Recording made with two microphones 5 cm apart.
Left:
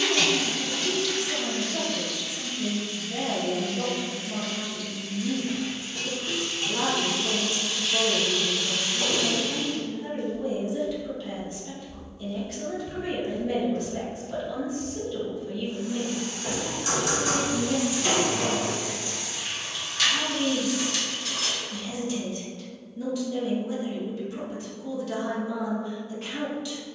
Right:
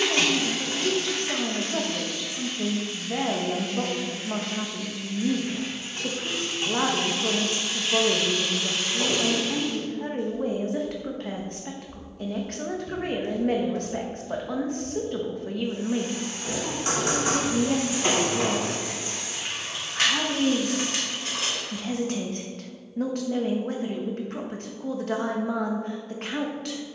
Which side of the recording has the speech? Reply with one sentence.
You can hear the speech on the right.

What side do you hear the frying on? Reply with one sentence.
You can hear the frying on the right.